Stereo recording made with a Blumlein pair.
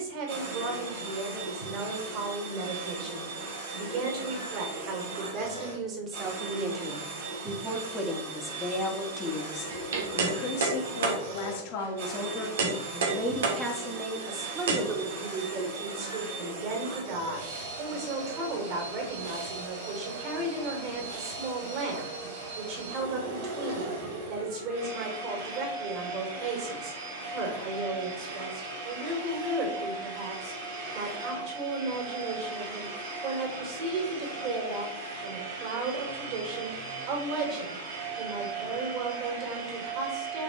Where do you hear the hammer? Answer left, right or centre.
right.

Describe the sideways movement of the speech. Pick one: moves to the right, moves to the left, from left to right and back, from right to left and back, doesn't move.
from right to left and back.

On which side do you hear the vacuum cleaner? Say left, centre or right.
right.